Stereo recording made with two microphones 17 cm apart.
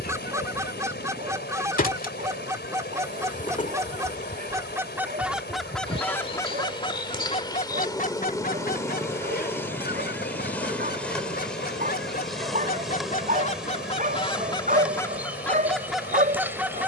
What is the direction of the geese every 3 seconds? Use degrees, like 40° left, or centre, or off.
20° right, 10° right, 40° left, 70° left, 40° left, centre.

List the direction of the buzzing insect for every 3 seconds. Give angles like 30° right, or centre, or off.
60° left, 40° left, 20° left, 10° left, centre, 10° right.